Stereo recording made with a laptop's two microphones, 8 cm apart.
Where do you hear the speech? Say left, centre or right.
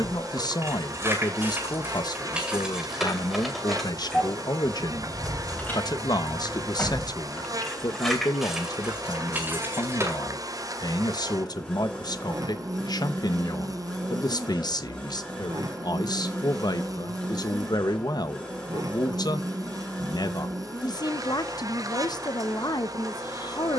left.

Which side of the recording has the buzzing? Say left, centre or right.
right.